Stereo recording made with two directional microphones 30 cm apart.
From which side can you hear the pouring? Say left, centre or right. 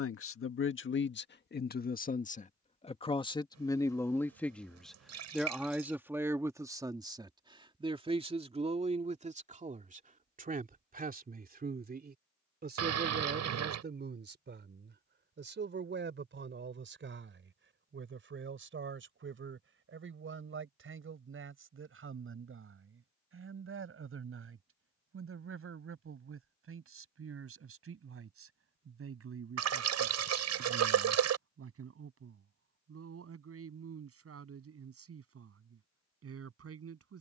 right.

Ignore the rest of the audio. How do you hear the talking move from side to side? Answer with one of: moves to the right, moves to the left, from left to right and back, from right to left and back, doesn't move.
moves to the right.